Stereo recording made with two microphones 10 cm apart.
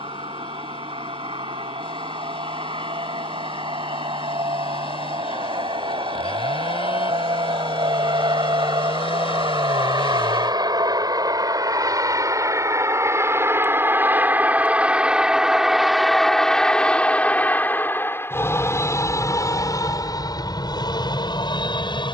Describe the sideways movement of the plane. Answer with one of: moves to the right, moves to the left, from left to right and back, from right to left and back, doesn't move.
moves to the left.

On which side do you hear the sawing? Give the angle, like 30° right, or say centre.
70° left.